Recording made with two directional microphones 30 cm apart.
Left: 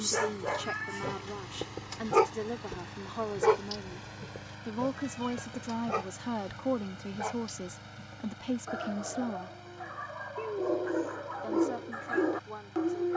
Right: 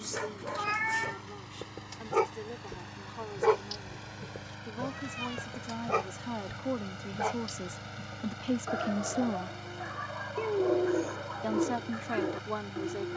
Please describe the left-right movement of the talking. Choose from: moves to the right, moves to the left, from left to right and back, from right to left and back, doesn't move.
moves to the right.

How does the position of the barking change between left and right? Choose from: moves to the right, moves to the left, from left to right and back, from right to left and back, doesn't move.
from left to right and back.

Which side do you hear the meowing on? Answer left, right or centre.
right.